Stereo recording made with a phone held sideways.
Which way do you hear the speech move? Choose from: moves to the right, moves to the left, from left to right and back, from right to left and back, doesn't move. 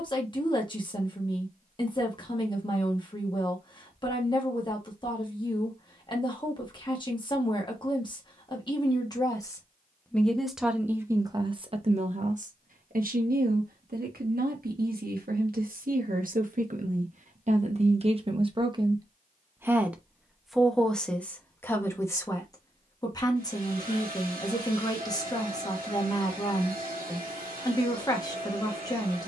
from left to right and back.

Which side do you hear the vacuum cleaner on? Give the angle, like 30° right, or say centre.
70° right.